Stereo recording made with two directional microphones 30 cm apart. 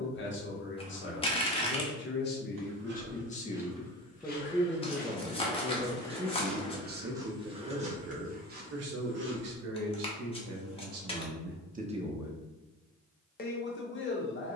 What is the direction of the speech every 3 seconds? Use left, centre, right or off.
left, centre, right, right, left.